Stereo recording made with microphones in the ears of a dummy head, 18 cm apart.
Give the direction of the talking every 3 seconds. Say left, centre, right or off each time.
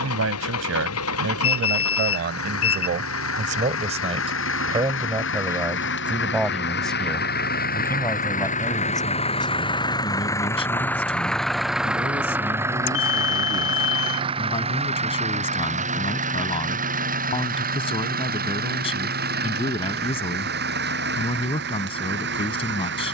right, right, centre, left, left, left, left, left.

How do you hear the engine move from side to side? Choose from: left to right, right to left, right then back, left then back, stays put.
left to right.